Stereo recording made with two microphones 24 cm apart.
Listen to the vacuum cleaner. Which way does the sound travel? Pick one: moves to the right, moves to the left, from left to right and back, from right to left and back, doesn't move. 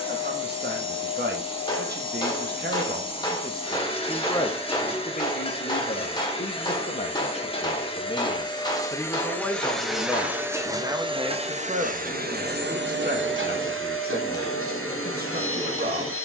moves to the right.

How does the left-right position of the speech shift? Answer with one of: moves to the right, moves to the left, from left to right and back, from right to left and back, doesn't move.
from right to left and back.